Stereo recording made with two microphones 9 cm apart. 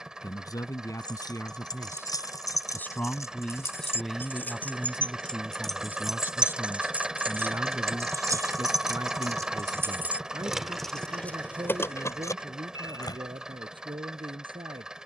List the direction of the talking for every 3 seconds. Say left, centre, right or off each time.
left, centre, right, right, right.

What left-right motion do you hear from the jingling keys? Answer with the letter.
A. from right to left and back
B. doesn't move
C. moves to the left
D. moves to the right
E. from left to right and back
E.